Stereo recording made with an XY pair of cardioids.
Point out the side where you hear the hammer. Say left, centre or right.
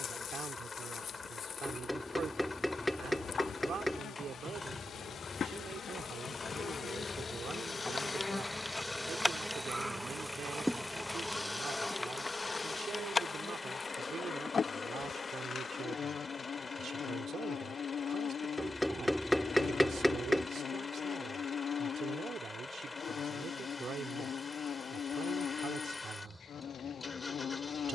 centre.